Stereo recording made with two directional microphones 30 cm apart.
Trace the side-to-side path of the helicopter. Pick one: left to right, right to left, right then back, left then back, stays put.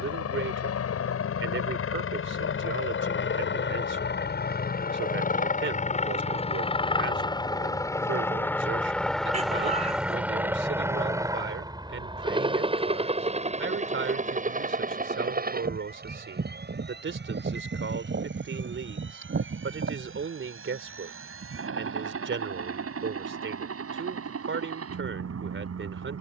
left to right.